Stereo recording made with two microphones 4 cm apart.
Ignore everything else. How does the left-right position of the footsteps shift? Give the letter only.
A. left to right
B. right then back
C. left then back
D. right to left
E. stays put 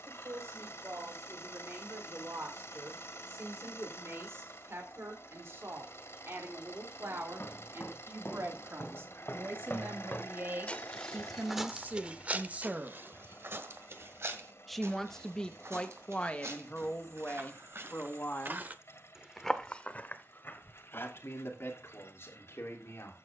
B.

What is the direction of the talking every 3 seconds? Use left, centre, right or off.
right, right, right, right, right, left, left, left.